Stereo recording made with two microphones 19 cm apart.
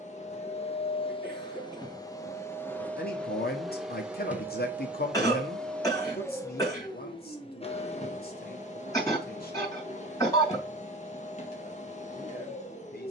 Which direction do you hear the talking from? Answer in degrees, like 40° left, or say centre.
50° left.